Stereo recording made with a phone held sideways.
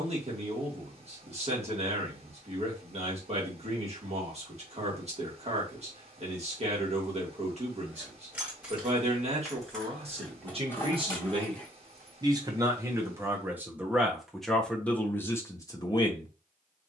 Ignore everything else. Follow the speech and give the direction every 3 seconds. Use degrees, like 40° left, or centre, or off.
50° right, 50° right, 50° right, 40° right, 10° right, 20° left.